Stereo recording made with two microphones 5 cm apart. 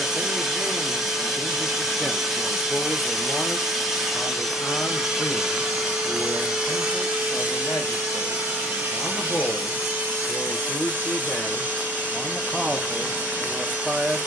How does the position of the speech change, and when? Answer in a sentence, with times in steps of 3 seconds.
You can hear the speech in the centre from 0 s, on the left from 3 s and in the centre from 12 s.